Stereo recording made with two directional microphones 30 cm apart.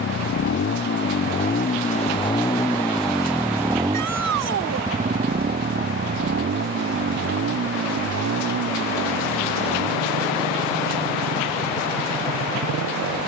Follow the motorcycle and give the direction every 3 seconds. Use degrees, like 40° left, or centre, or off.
30° left, 20° right, 40° right, 60° right, 60° right.